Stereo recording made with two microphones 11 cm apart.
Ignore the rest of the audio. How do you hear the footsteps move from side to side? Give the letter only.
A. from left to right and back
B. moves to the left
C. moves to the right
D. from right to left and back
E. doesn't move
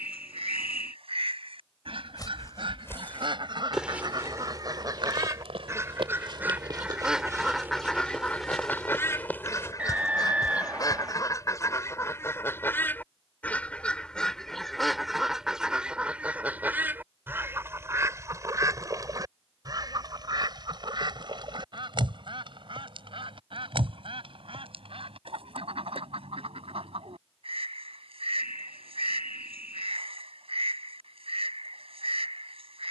A.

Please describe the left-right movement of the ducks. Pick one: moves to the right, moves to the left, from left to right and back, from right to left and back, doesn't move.
from right to left and back.